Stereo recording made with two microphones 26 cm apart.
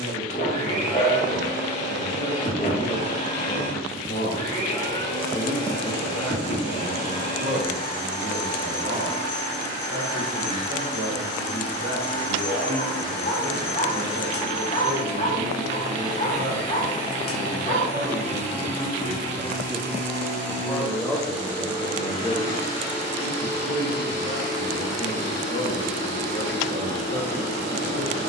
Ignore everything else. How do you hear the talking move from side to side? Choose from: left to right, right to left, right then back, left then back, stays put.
right then back.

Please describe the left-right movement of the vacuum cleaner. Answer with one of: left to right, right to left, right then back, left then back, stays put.
stays put.